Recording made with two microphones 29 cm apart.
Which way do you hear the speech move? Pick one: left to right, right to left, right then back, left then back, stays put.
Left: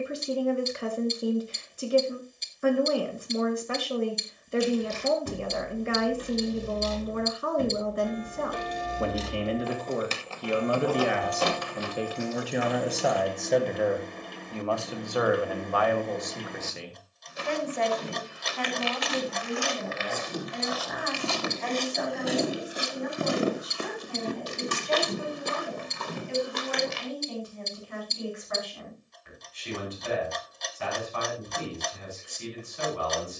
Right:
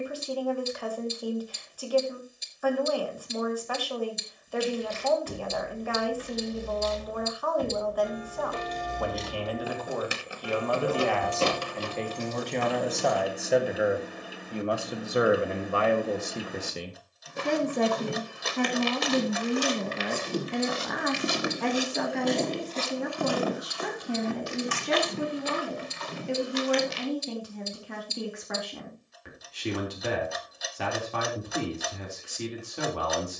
left to right.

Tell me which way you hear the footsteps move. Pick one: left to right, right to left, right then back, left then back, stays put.
right to left.